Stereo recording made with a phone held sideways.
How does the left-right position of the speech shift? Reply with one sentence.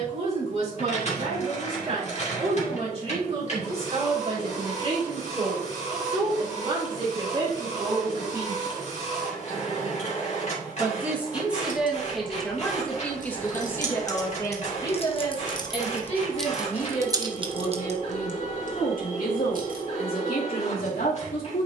You can hear the speech go from the right side to the left.